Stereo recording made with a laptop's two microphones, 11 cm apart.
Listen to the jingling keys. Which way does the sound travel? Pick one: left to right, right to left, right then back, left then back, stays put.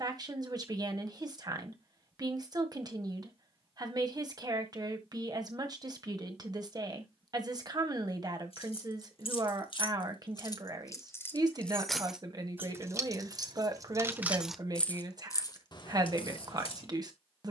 right then back.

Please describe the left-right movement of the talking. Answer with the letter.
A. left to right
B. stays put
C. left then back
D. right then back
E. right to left
B.